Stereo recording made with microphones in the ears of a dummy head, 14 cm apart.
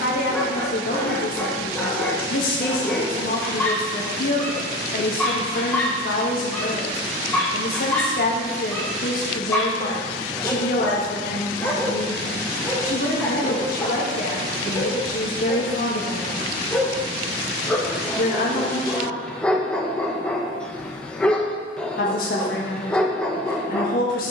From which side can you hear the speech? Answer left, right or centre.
left.